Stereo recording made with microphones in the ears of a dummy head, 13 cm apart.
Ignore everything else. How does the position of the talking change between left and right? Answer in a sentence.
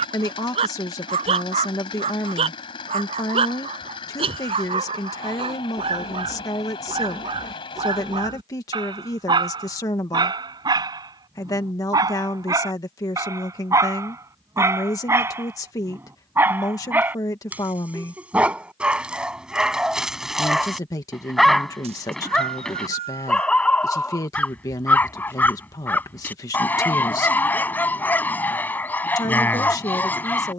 You can hear the talking stay in one place.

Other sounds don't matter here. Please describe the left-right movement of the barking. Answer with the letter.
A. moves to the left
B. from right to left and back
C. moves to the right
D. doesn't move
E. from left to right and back
A.